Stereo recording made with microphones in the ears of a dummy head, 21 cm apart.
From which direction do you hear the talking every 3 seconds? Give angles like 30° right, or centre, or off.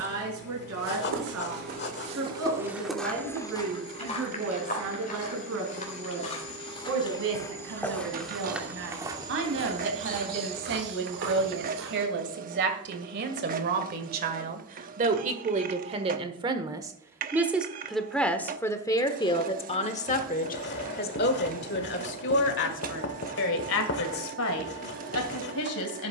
70° right, 70° right, 60° right, 60° right, 50° right, 20° right, 20° left, 50° left, 70° left.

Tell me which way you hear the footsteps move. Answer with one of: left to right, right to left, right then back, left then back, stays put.
left then back.